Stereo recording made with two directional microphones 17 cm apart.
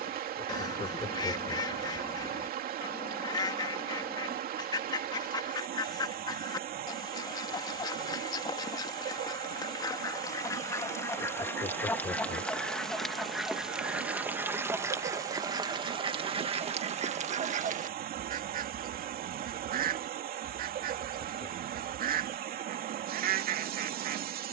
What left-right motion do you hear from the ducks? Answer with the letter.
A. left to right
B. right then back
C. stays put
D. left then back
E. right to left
A.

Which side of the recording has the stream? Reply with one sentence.
You can hear the stream on the right.